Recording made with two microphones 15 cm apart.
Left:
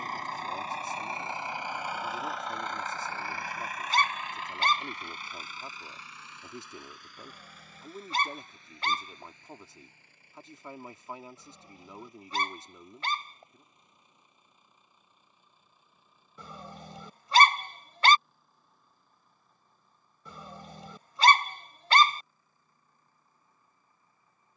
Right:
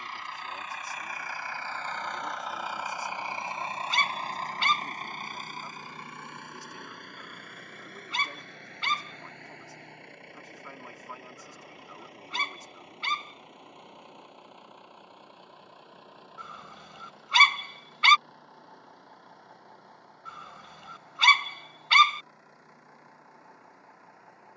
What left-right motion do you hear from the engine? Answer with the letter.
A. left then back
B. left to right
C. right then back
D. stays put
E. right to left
B.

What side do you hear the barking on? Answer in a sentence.
In this clip you hear the barking on the left.